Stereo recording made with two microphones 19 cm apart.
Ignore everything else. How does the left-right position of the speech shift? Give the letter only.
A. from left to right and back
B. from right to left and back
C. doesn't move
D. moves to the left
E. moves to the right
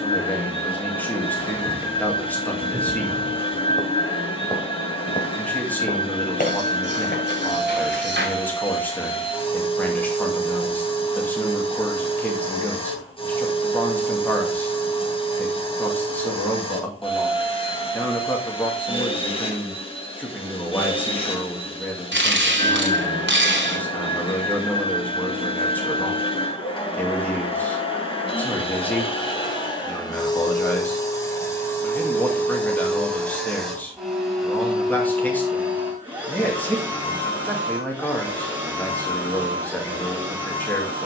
C.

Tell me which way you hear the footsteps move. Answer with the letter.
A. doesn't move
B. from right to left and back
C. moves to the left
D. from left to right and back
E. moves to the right
C.